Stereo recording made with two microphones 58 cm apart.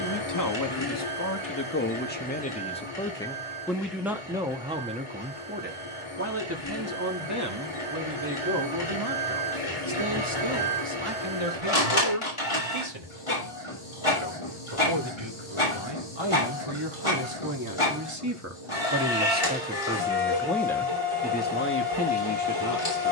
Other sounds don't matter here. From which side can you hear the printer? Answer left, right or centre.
left.